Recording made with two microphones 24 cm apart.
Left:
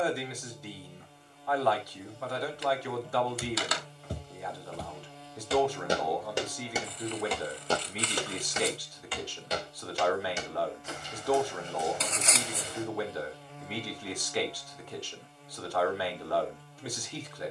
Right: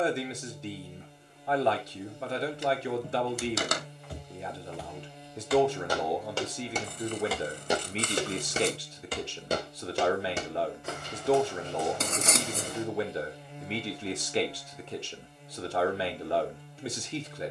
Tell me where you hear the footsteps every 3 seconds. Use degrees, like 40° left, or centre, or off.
off, 40° left, 10° right, 60° right, 70° right, off.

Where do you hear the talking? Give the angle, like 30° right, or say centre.
30° right.